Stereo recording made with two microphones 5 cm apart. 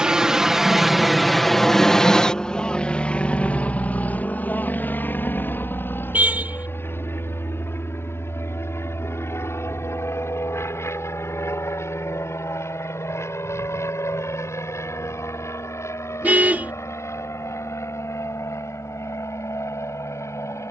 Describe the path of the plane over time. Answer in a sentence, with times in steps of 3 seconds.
You can hear the plane in the centre from 0 s and on the left from 3 s.